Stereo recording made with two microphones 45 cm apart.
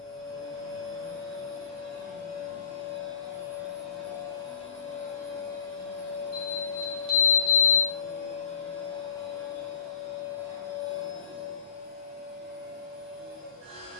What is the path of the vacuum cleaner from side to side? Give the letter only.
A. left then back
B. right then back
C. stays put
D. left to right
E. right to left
A.